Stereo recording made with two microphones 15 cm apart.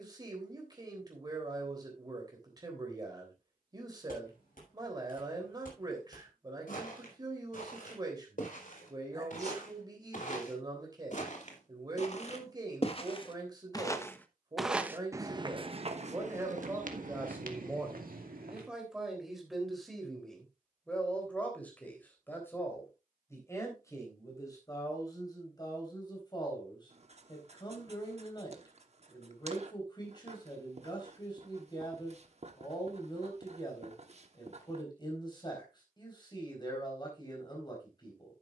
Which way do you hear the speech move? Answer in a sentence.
In this clip you hear the speech move to the left.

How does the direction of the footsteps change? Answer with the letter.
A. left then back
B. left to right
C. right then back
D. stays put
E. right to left
B.